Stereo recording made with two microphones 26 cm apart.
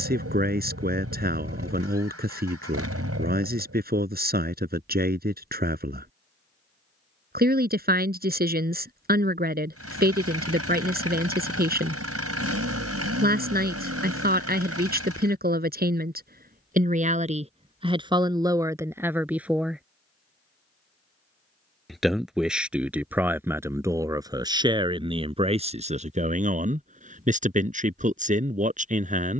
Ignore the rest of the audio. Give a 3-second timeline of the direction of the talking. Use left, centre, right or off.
right, right, right, right, right, right, centre, centre, right, right.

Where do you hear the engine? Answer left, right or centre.
right.